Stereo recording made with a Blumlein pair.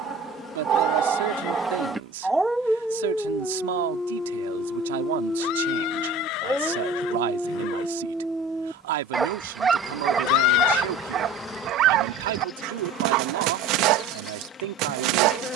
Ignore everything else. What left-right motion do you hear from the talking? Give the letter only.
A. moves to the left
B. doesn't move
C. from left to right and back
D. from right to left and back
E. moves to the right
B.